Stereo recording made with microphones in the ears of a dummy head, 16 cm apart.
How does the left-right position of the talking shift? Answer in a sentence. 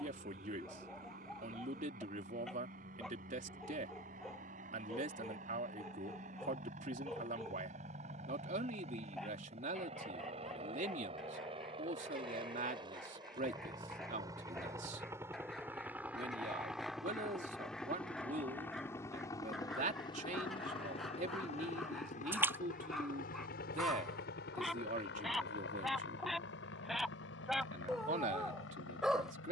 You can hear the talking stay put.